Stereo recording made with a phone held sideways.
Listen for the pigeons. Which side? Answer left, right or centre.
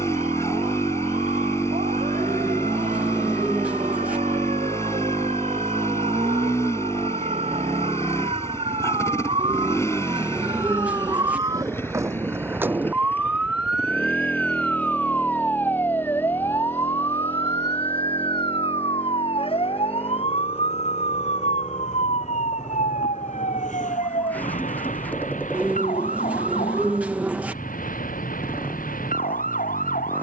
centre.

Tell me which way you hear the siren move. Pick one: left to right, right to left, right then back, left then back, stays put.
right to left.